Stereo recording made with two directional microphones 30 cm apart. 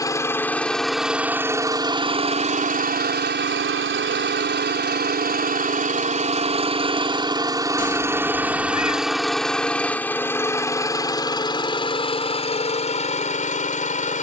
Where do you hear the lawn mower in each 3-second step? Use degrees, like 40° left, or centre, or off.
10° right, 30° right, 10° right, 10° left, 20° left.